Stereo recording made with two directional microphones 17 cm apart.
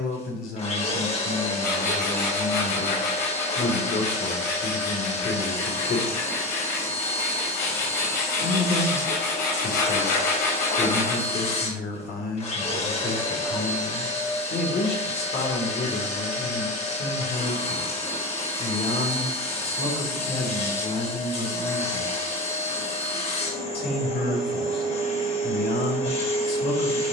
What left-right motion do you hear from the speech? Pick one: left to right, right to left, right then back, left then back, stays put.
stays put.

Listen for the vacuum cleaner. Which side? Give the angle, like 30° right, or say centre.
40° left.